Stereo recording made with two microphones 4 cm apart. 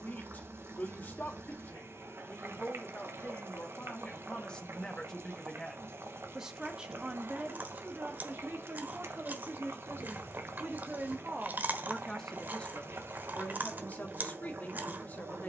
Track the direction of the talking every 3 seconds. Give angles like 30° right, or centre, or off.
40° left, 20° left, 30° right, 40° right, 40° left.